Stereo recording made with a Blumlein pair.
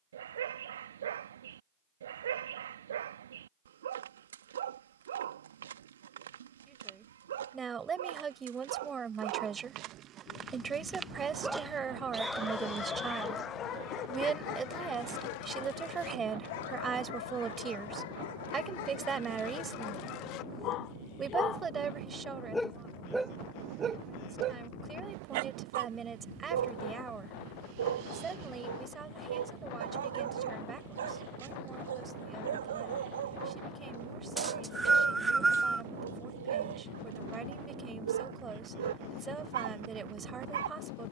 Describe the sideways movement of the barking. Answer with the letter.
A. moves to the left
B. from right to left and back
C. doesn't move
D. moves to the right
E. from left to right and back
B.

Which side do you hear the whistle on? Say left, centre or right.
centre.